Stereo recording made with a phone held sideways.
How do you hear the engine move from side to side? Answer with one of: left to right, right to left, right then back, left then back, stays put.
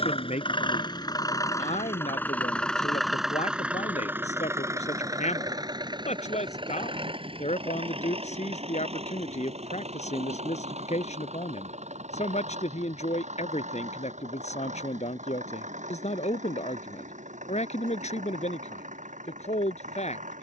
left to right.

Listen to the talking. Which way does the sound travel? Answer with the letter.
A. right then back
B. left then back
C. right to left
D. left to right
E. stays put
E.